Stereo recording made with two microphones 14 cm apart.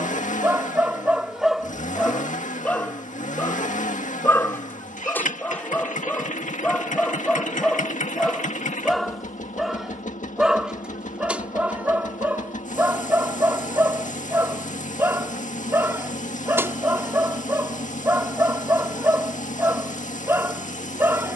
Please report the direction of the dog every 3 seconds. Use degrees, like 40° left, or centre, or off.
centre, 10° left, 10° left, 10° right, 20° right, 20° right, 20° right.